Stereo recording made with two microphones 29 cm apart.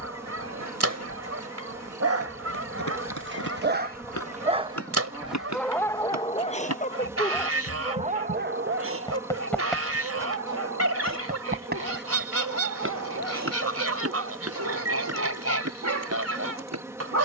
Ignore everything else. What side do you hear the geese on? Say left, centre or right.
right.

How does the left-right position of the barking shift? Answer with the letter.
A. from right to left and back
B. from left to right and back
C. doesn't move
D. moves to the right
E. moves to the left
A.